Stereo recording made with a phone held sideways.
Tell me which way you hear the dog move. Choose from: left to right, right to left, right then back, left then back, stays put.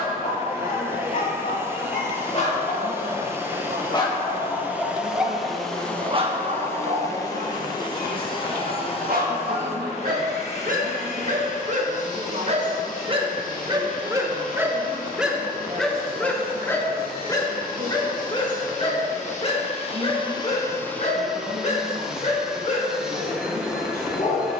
right then back.